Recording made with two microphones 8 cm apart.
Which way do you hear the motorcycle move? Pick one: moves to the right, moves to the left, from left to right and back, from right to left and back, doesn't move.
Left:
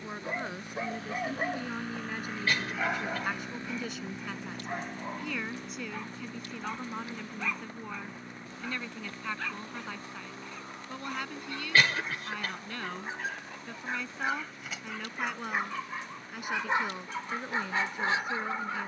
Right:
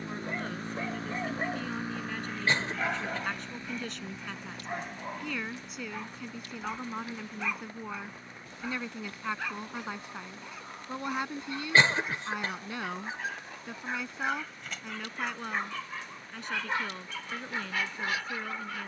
moves to the left.